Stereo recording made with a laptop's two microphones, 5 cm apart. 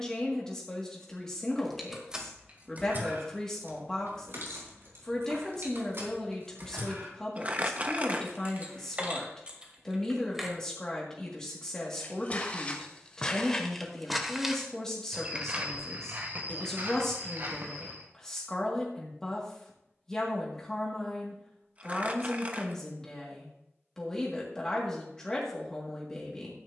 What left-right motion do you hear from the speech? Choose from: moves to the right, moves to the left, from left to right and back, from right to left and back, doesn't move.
doesn't move.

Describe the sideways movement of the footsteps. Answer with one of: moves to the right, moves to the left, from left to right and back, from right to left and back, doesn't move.
moves to the right.